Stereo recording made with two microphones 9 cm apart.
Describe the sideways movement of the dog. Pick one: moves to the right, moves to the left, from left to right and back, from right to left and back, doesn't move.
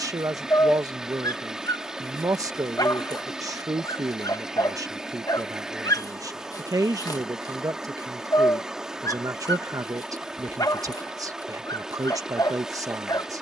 doesn't move.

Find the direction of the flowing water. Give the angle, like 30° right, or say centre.
10° right.